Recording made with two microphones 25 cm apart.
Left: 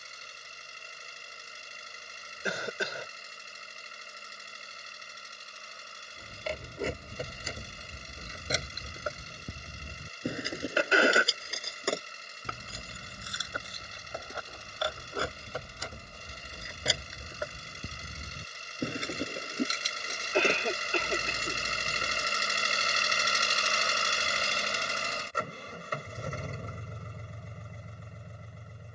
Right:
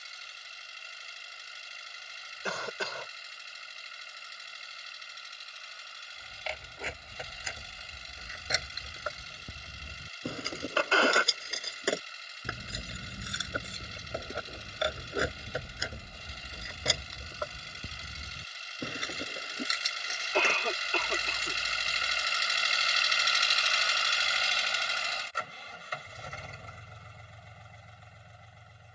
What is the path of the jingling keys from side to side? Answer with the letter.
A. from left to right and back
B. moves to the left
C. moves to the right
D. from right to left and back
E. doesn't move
A.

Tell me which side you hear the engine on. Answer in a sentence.
You can hear the engine on the left.